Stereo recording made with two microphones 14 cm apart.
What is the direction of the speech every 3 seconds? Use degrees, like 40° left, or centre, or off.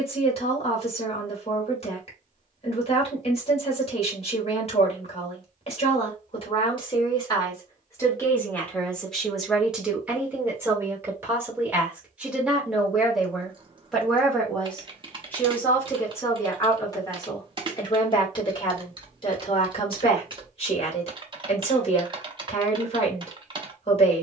40° left, 40° left, 30° left, 10° right, centre, 20° left, 40° left, 40° left.